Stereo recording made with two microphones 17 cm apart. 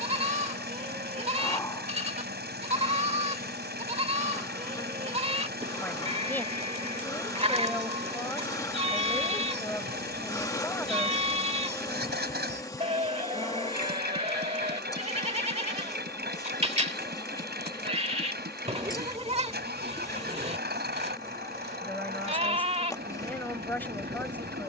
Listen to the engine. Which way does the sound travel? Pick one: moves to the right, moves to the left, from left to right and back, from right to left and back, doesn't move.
doesn't move.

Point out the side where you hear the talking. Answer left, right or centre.
centre.